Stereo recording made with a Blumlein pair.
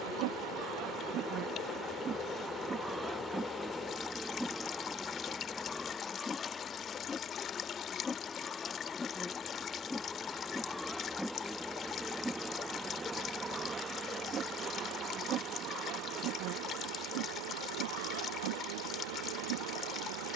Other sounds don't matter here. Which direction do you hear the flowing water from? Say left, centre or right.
left.